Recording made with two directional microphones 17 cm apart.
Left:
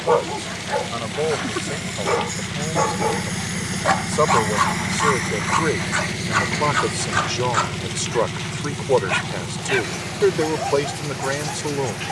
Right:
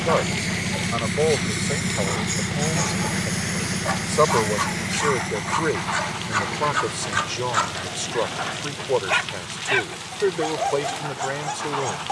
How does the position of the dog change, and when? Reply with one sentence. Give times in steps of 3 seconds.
You can hear the dog on the left from 0 s and in the centre from 6 s.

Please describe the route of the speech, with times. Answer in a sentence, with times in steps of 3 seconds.
You can hear the speech in the centre from 0 s and on the left from 6 s.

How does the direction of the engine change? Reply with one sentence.
In this clip you hear the engine move to the left.